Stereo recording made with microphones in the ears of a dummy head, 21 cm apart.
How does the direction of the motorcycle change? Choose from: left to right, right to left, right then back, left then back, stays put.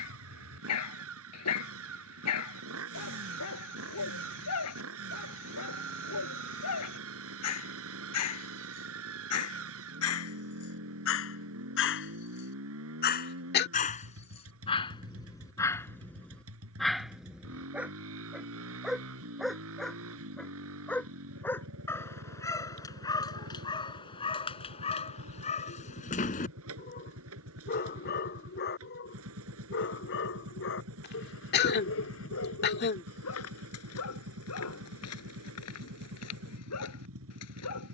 stays put.